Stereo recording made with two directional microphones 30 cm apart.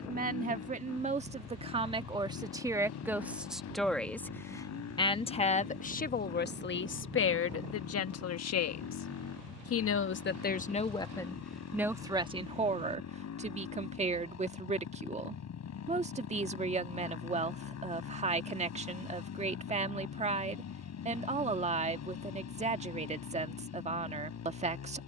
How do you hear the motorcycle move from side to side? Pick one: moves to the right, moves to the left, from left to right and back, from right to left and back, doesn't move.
doesn't move.